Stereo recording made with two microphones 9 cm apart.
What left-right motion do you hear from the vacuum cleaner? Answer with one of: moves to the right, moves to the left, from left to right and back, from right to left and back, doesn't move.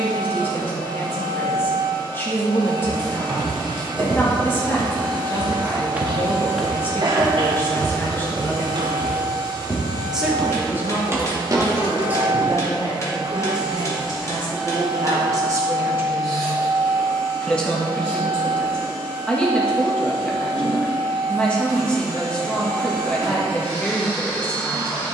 moves to the left.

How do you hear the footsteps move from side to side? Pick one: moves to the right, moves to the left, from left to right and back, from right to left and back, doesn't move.
from right to left and back.